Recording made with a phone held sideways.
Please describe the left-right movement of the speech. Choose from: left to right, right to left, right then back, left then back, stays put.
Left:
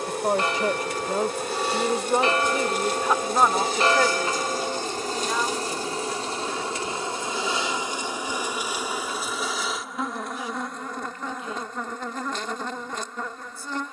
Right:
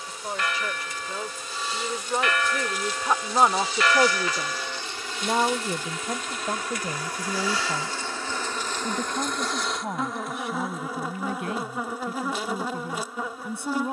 left to right.